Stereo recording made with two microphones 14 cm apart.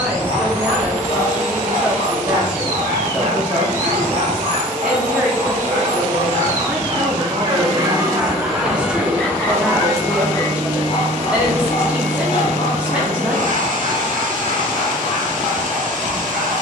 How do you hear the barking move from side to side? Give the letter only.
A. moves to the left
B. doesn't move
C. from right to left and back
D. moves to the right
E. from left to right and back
A.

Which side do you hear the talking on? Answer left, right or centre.
centre.